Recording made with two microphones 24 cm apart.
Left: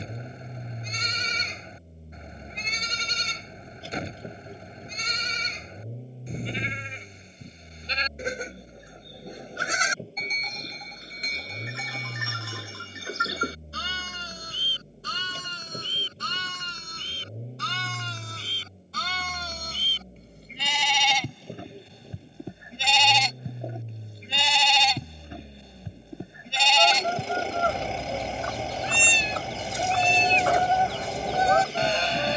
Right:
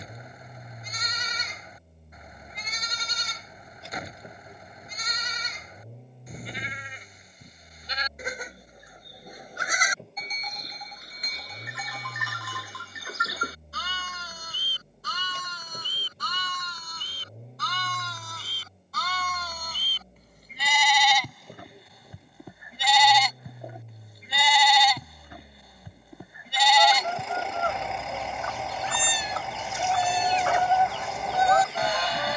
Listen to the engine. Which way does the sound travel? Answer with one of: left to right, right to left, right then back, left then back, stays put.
stays put.